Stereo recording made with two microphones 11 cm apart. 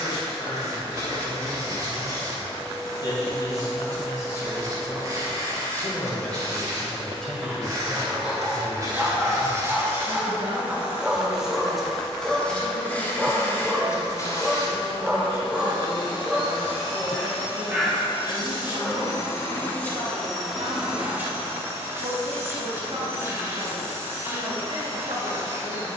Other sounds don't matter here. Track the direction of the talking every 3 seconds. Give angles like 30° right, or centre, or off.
40° left, 30° left, centre, 30° right, 60° right, 60° right, 60° right, 60° right, 60° right.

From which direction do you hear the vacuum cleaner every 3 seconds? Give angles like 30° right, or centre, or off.
30° right, 30° right, 30° right, 20° right, 20° left, 50° left, 20° left, 20° right, 20° right.